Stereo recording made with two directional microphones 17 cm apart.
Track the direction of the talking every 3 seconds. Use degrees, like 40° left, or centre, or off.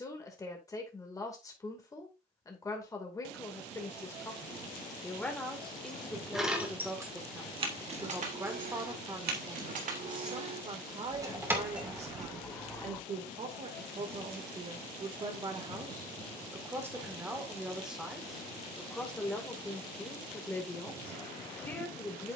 20° left, 10° left, 10° right, 30° right, 40° right, 20° right, 10° left, 10° left.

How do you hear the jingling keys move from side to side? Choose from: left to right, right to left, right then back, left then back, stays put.
right then back.